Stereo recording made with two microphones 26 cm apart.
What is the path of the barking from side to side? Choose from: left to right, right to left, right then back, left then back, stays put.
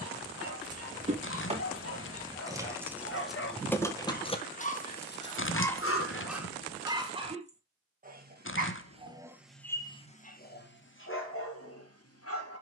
right then back.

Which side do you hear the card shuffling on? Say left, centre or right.
left.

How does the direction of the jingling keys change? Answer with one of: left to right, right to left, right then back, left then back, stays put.
right to left.